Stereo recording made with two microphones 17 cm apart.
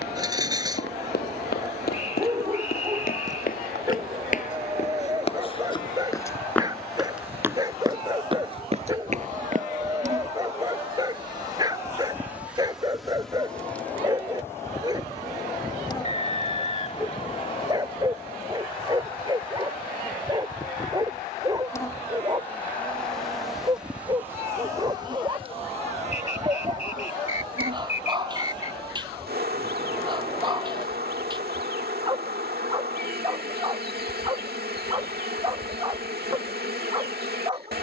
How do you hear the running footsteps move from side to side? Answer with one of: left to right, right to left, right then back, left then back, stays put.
left to right.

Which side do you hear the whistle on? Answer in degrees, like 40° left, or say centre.
40° left.